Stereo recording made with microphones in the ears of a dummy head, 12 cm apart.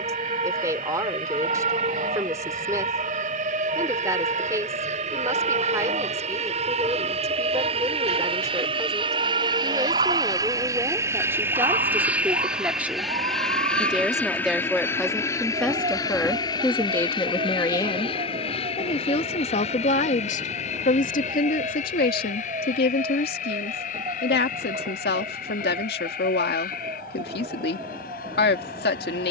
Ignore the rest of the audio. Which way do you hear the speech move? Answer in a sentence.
You can hear the speech travel towards the left.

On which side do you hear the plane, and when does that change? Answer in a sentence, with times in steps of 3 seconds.
In this clip you hear the plane on the right from 0 s, in the centre from 12 s and on the left from 15 s.